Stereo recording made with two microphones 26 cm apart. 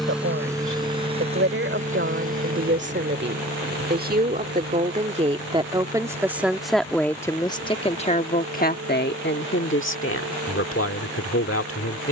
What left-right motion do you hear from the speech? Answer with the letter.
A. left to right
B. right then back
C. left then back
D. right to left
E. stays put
D.